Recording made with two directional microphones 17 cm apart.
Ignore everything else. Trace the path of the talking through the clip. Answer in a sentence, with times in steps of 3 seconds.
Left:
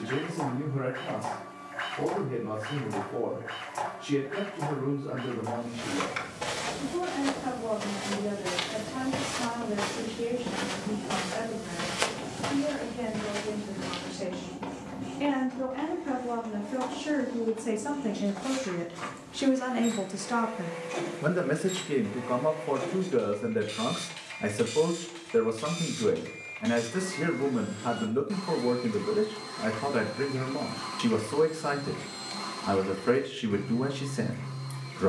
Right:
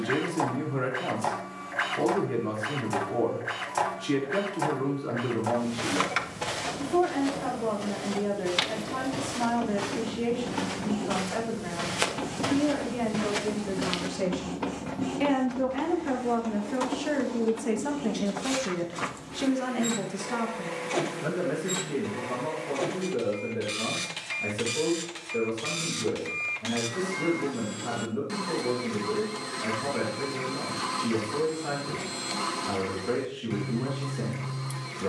You can hear the talking on the right from 0 s, in the centre from 18 s and on the left from 21 s.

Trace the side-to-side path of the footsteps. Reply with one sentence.
In this clip you hear the footsteps move from right to left and back again.